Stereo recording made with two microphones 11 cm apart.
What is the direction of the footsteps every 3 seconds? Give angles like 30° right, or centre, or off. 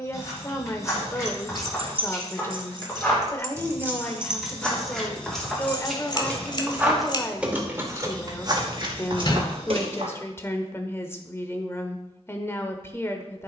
20° left, 10° left, 30° right, 50° right, off.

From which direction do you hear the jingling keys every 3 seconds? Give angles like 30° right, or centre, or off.
60° right, 10° right, 20° right, 60° right, off.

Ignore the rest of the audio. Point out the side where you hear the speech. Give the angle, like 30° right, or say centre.
20° left.